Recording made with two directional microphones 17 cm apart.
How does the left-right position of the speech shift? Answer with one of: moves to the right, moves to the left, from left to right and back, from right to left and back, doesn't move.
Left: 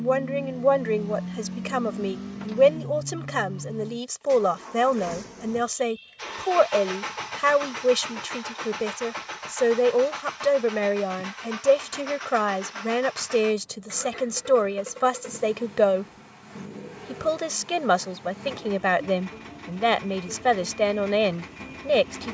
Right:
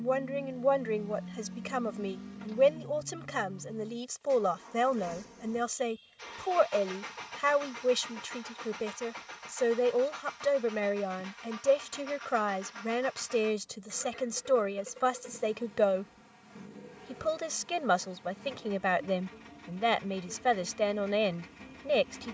doesn't move.